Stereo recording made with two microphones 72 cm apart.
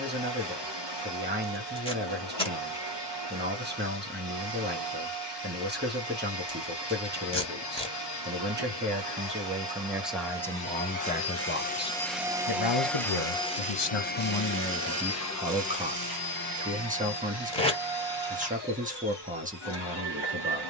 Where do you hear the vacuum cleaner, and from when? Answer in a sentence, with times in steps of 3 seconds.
In this clip you hear the vacuum cleaner on the left from 0 s, in the centre from 12 s and on the left from 15 s.